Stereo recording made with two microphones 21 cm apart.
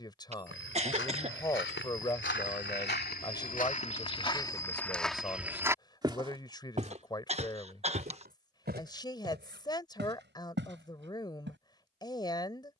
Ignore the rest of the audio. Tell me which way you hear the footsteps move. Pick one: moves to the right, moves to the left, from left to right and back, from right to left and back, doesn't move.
moves to the right.